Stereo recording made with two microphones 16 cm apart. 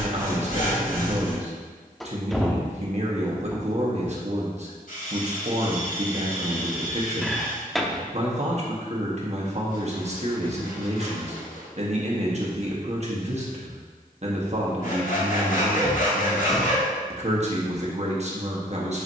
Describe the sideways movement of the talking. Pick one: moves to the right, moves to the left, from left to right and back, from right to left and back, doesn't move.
doesn't move.